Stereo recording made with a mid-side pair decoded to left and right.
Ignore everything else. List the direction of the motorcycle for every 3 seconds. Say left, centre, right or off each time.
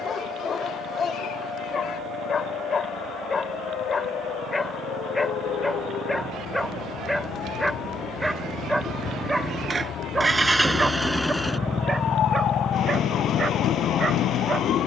right, right, right, centre, left.